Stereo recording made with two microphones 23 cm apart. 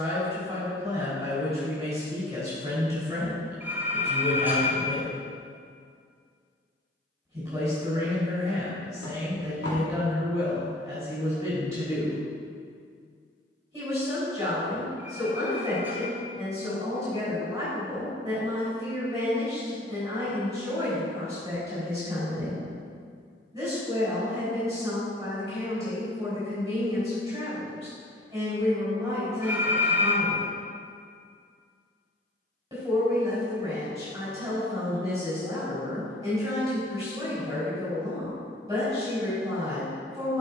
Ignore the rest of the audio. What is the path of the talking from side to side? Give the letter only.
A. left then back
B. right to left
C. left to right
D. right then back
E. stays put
E.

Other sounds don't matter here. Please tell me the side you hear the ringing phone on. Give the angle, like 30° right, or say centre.
10° right.